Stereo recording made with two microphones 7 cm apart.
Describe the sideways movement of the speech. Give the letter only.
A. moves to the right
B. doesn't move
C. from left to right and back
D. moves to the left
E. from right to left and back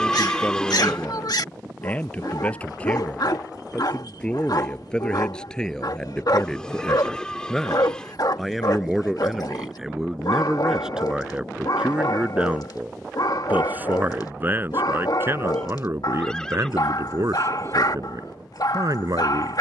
A.